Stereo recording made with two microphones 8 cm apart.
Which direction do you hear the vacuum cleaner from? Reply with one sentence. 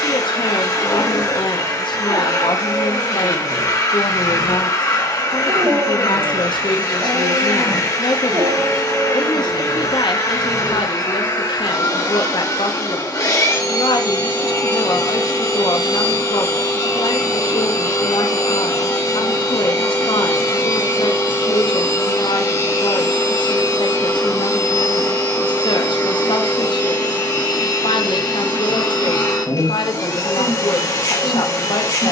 You can hear the vacuum cleaner on the left.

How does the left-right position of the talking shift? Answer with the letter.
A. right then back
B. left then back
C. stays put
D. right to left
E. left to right
C.